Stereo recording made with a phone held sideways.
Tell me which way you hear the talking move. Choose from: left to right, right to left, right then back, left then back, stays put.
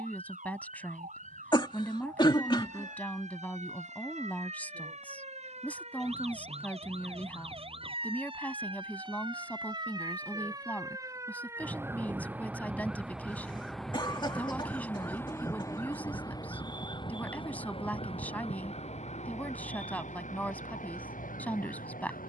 stays put.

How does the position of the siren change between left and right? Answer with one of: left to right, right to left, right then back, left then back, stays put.
right to left.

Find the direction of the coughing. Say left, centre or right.
left.